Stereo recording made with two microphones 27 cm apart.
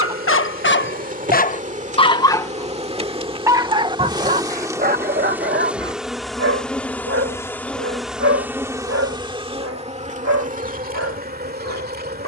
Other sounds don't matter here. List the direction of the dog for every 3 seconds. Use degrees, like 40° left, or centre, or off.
30° left, 30° right, 50° right, 60° right.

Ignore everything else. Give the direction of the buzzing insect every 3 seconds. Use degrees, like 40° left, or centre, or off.
30° right, 10° right, centre, 30° right.